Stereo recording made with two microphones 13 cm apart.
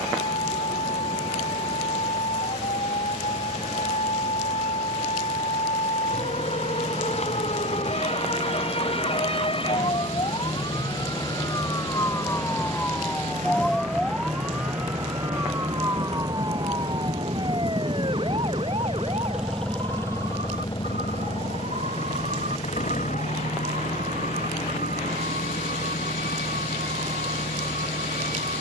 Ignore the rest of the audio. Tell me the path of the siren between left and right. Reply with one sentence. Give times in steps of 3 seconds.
In this clip you hear the siren on the left from 0 s, in the centre from 12 s and on the right from 15 s.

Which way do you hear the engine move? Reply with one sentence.
In this clip you hear the engine move to the left.